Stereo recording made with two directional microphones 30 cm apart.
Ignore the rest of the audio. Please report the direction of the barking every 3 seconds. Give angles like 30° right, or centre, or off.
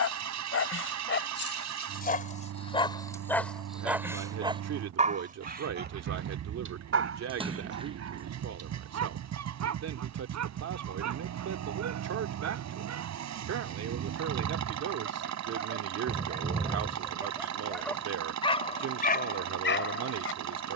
40° left, 10° right, 50° right, 60° right, 50° right, 20° right, 30° left.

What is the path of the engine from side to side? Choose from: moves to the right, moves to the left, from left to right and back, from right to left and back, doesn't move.
doesn't move.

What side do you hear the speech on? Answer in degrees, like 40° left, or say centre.
60° right.